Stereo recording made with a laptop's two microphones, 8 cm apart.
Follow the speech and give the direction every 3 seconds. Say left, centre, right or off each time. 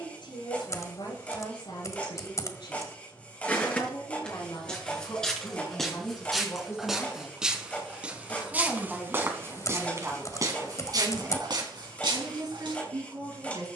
left, left, left, right, right.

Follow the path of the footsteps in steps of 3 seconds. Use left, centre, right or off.
off, centre, centre, right, right.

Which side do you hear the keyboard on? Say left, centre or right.
left.